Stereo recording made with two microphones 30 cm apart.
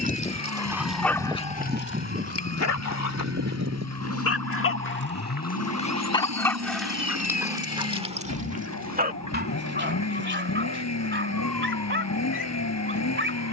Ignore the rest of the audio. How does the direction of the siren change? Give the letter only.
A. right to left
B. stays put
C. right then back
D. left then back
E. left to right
E.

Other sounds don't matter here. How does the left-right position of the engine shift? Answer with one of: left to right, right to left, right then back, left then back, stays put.
stays put.